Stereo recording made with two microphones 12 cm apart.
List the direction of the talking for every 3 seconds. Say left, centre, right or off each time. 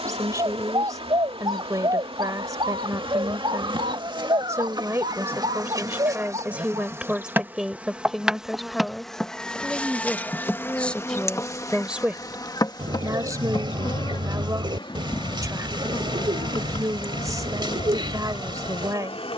right, right, centre, centre, right, right, right.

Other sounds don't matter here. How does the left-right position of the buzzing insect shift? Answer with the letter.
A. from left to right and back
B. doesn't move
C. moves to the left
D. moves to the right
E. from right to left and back
C.